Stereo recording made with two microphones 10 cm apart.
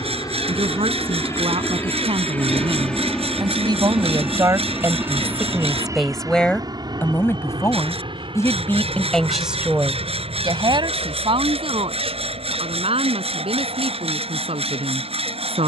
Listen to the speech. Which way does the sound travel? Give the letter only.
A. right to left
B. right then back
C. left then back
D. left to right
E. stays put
C.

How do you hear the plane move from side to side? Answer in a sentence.
You can hear the plane move to the right.